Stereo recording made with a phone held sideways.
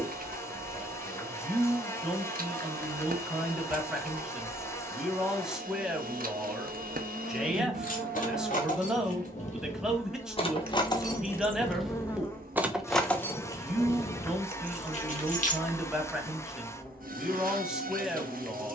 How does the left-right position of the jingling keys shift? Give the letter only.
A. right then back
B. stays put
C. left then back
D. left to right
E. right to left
A.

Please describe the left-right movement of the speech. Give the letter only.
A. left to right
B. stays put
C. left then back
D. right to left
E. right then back
B.